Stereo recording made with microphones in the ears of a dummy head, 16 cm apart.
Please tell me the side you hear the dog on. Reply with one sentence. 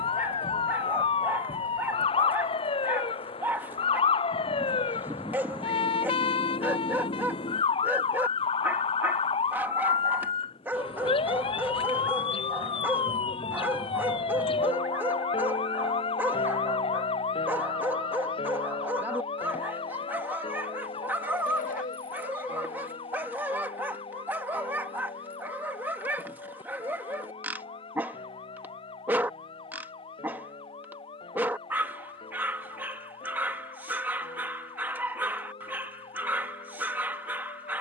In this clip you hear the dog in the centre.